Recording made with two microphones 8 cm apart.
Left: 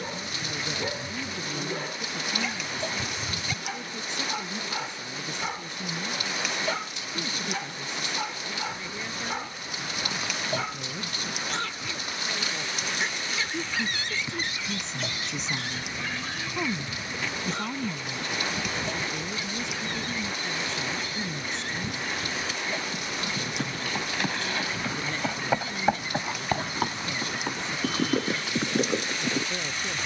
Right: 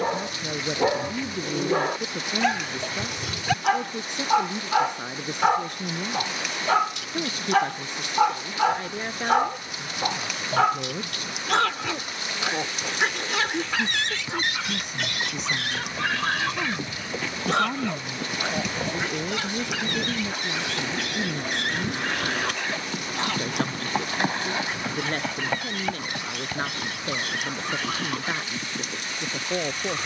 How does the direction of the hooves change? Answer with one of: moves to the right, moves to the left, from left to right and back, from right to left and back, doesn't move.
moves to the left.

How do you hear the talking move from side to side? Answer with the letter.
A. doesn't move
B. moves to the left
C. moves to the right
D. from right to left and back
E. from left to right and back
D.